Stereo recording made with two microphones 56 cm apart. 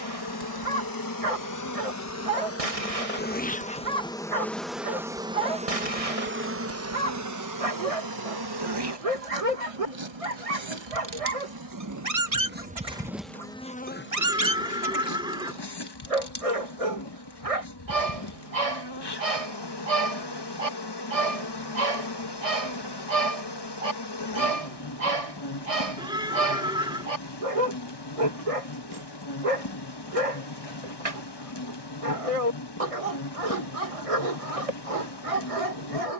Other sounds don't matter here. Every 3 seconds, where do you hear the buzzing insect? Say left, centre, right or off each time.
left, centre, right, right, centre, left, left, left, left, left, left, left.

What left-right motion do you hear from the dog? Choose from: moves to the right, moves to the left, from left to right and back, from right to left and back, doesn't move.
doesn't move.